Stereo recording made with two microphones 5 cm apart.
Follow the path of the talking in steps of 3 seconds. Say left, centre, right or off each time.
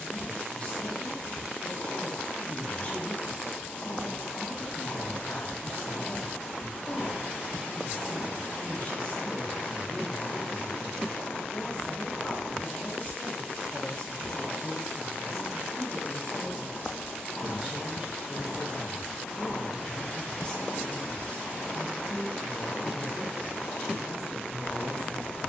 left, left, left, left, left, right, centre, left, left.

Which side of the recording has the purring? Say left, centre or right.
left.